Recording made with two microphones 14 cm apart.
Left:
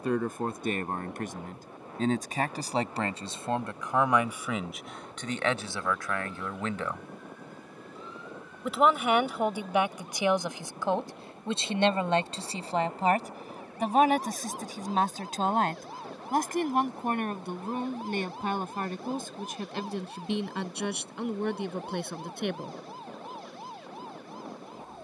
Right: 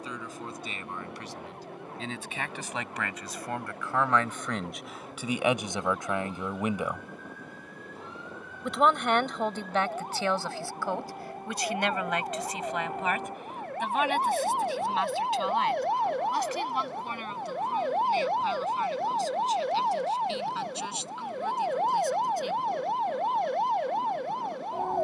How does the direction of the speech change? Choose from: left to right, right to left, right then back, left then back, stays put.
right then back.